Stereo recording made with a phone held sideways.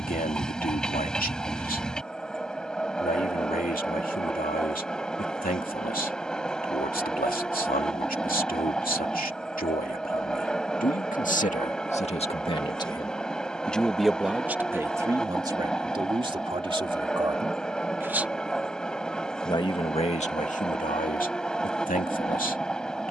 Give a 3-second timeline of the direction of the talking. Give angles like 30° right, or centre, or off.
70° left, 70° left, 70° left, 70° left, 10° left, 30° right, 40° left, 70° left.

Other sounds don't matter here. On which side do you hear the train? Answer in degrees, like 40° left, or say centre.
10° left.